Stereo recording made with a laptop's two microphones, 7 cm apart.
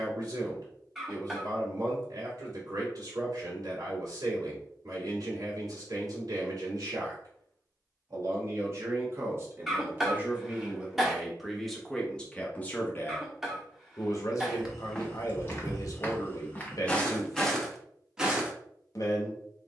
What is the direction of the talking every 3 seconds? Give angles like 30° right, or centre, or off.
50° right, 50° right, 50° right, 20° right, 30° left, 50° left, 50° left.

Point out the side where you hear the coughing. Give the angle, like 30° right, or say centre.
centre.